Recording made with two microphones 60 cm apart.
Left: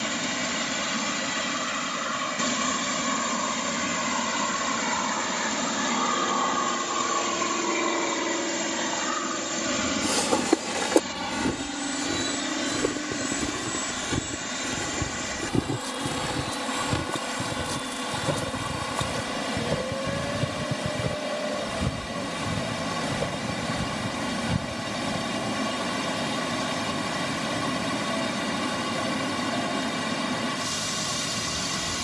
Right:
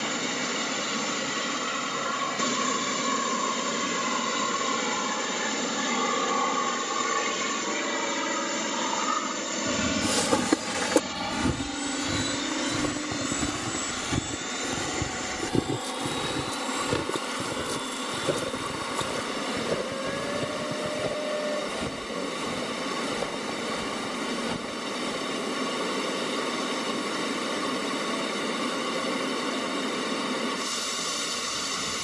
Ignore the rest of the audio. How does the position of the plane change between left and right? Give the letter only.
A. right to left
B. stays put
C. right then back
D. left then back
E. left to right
A.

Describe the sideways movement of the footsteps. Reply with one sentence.
You can hear the footsteps travel towards the left.